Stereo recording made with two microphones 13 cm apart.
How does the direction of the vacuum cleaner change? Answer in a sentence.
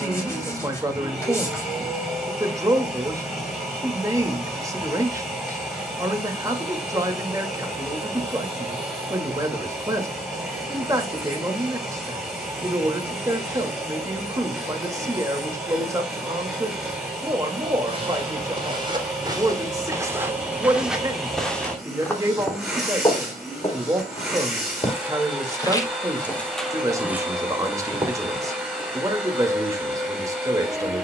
You can hear the vacuum cleaner stay put.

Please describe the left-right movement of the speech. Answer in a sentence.
In this clip you hear the speech stay in one place.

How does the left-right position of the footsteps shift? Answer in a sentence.
In this clip you hear the footsteps move from right to left and back again.